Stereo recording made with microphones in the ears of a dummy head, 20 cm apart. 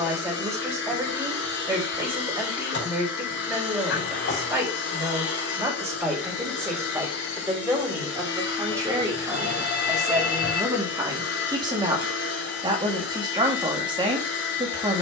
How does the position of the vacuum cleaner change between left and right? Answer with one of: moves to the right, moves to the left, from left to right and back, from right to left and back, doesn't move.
doesn't move.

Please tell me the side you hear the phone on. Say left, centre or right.
left.